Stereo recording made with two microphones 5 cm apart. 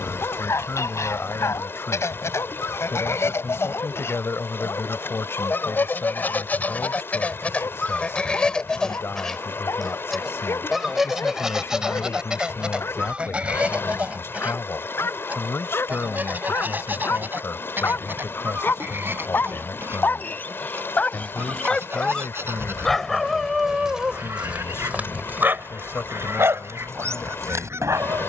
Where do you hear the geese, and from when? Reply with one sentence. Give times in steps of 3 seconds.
You can hear the geese on the left from 0 s, in the centre from 9 s and on the right from 12 s.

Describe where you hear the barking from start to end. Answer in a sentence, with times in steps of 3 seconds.
In this clip you hear the barking on the left from 0 s, in the centre from 21 s and on the right from 24 s.